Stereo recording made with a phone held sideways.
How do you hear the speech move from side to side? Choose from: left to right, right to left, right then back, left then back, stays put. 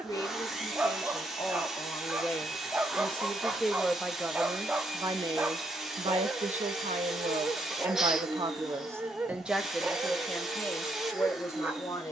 right then back.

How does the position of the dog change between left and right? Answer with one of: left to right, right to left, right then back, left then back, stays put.
stays put.